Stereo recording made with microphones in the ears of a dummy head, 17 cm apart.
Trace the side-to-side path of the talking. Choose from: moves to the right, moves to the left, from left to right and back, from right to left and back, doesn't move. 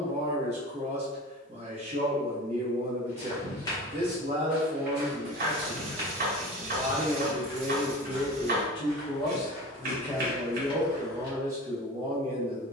from right to left and back.